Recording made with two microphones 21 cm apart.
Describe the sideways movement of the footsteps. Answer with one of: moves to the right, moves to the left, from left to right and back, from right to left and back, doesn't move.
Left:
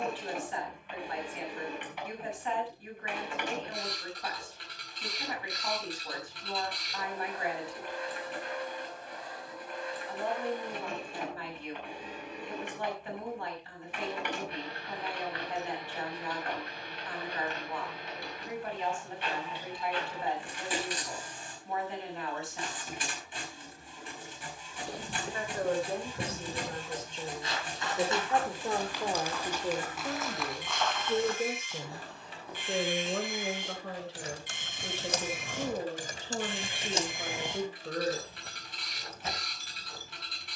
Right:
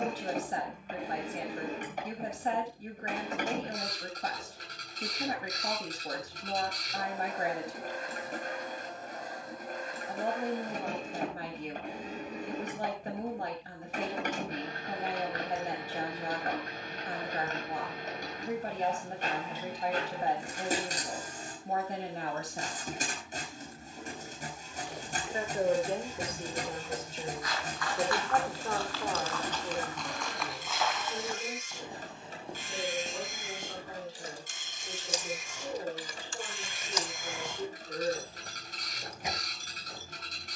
moves to the right.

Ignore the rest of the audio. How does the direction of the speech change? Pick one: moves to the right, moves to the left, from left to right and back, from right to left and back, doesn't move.
moves to the left.